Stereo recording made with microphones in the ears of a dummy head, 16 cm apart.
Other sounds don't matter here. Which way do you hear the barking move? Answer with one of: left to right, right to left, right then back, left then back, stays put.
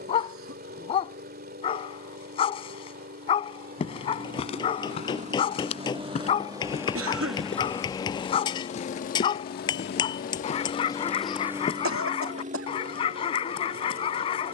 stays put.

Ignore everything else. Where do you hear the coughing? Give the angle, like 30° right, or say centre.
80° right.